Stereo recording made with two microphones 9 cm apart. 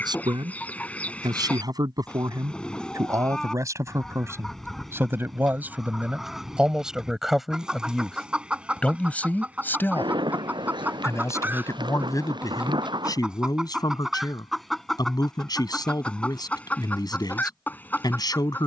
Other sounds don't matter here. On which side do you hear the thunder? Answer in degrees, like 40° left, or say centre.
60° right.